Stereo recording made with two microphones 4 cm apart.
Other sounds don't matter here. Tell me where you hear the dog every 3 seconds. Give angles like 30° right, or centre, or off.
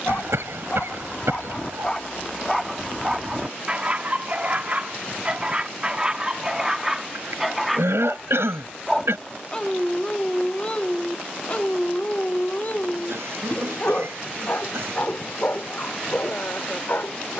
20° left, 30° right, 10° right, 30° left, 50° left, 60° left.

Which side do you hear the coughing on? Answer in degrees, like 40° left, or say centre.
80° right.